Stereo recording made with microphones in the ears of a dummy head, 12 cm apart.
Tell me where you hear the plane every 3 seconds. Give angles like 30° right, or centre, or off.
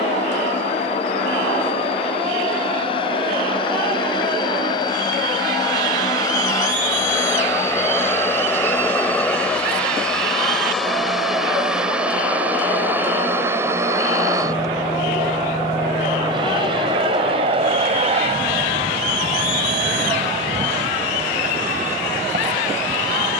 50° left, 40° left, 20° left, centre, 20° right, 30° right, 50° right, 60° right.